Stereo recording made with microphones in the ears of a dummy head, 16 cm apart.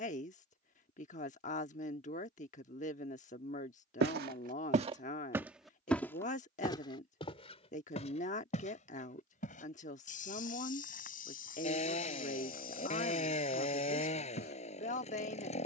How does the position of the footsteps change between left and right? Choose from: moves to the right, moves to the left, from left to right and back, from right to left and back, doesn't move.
moves to the left.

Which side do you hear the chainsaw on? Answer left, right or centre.
left.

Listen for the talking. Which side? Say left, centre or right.
left.